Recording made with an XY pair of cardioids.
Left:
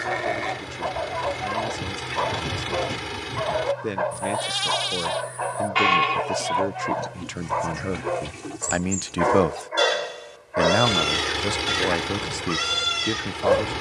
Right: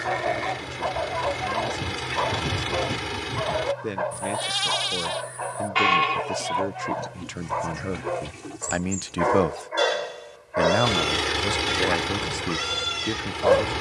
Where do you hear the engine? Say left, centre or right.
centre.